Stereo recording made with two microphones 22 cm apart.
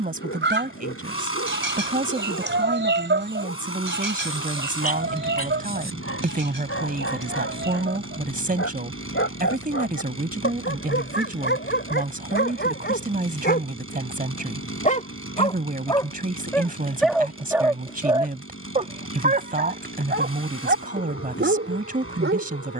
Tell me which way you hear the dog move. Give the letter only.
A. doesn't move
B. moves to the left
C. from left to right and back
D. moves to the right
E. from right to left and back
D.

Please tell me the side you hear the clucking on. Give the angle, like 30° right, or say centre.
60° right.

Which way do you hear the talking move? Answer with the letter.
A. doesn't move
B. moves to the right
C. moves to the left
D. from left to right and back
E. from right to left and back
A.